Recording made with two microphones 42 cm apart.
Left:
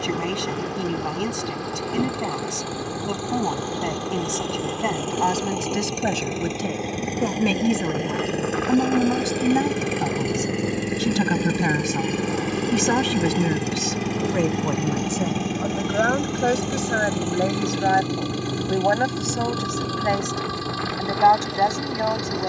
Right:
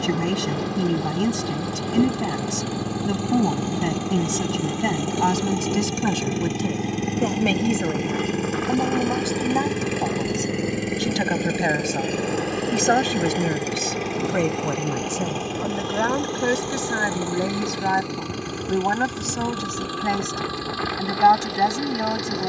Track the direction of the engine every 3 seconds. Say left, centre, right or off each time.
right, right, right, centre, left, left, left, left.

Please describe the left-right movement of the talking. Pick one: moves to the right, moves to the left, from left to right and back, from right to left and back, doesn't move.
from right to left and back.